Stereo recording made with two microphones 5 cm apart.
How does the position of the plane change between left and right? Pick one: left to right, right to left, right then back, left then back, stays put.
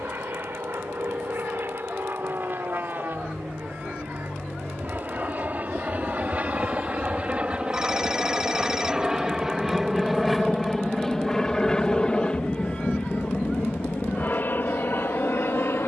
right to left.